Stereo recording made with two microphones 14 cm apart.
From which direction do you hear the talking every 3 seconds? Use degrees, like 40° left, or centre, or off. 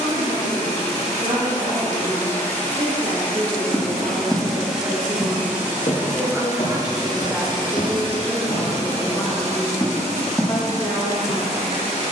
50° right, 30° right, centre, 30° left.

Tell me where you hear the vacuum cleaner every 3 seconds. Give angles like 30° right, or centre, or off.
20° left, centre, 30° right, 50° right.